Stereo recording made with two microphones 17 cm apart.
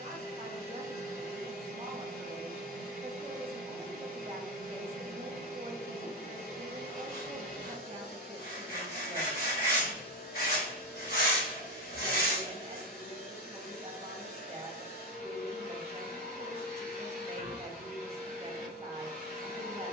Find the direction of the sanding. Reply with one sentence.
In this clip you hear the sanding on the left.